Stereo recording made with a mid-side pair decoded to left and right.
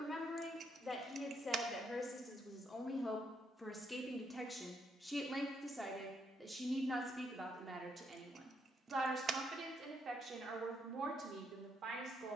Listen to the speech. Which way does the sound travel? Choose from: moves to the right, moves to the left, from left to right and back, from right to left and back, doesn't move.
moves to the right.